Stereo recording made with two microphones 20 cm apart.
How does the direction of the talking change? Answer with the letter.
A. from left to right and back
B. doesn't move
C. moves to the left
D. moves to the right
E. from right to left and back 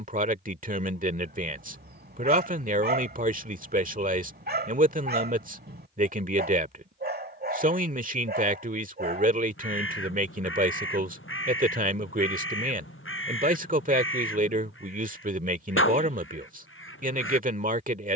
B.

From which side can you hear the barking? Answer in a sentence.
In this clip you hear the barking on the right.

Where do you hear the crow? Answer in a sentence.
In this clip you hear the crow on the left.